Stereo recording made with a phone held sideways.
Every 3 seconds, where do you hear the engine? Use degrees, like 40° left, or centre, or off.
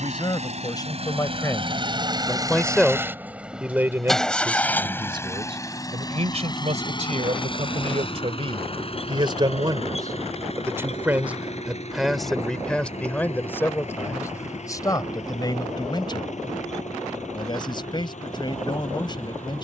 40° right, 10° left, 40° left, 50° left, 60° left, 60° left, 60° left.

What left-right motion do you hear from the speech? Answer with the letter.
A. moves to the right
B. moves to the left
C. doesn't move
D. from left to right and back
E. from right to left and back
D.